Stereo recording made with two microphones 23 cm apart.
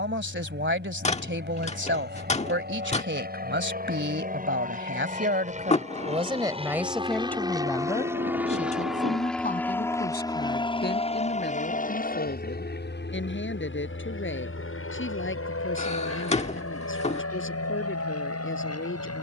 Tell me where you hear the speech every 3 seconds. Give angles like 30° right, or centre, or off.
50° right, 50° right, 10° left, 40° left, 50° left, 60° left, 60° left.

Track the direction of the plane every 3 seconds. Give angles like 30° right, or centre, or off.
50° right, 40° right, 20° right, 20° left, 50° left, 70° left, 70° left.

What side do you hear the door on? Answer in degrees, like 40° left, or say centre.
30° left.